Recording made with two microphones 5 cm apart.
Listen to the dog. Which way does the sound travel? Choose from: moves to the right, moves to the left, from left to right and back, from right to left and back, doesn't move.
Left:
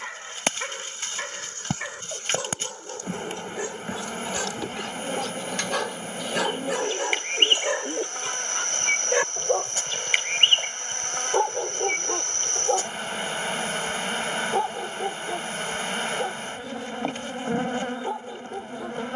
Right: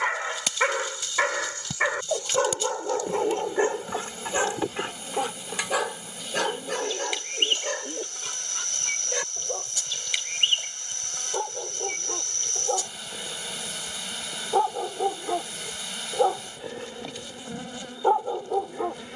from right to left and back.